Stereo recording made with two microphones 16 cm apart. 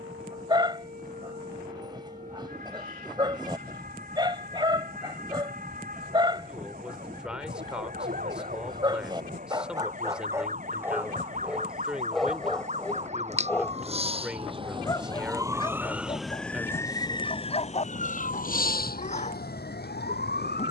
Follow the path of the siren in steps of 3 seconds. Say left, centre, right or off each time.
right, right, right, right, right, centre, left.